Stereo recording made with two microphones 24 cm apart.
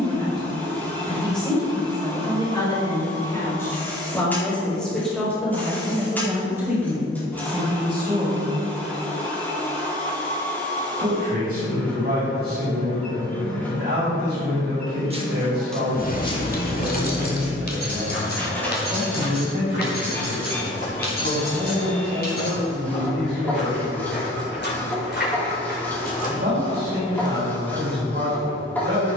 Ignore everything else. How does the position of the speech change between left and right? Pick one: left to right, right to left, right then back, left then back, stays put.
left to right.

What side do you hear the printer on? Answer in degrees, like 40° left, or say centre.
10° left.